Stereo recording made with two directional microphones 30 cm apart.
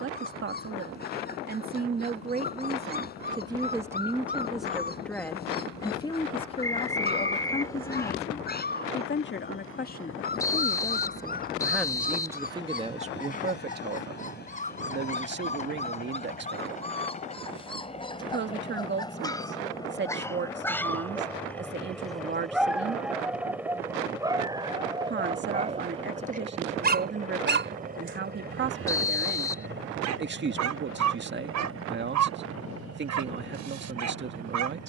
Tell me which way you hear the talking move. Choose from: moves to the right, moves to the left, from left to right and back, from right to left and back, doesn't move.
from right to left and back.